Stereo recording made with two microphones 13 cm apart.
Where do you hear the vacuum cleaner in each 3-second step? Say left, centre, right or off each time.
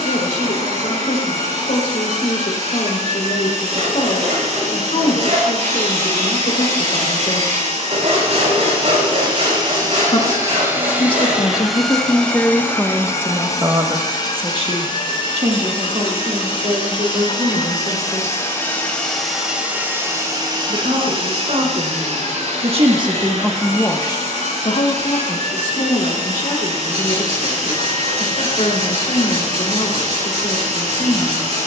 right, right, right, right, left, left, centre, right, right, right, right.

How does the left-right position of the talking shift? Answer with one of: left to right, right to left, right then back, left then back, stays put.
right then back.